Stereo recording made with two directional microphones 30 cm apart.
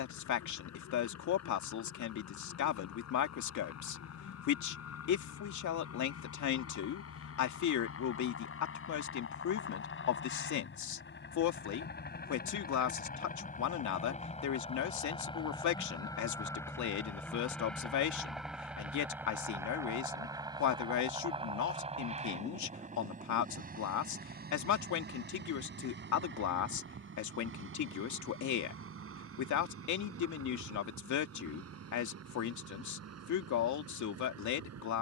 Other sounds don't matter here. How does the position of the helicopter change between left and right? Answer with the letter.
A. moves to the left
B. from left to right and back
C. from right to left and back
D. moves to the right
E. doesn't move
D.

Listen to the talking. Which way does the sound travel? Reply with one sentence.
In this clip you hear the talking stay in one place.